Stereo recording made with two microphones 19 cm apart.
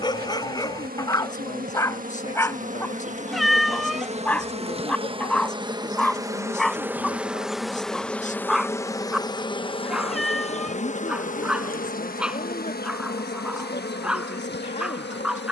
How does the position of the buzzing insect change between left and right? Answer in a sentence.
You can hear the buzzing insect move from right to left.